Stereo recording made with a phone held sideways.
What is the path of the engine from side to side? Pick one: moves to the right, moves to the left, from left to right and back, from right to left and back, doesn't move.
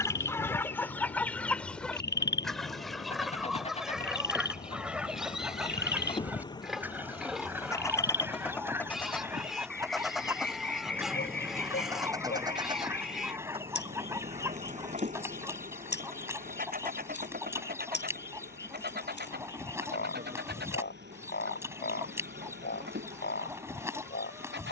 moves to the right.